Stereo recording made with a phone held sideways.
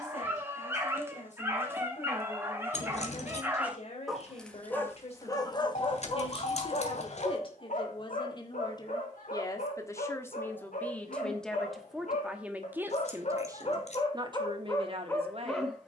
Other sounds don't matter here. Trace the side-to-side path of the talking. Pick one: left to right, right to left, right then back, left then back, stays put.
left to right.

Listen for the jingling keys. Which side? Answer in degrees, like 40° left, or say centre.
50° left.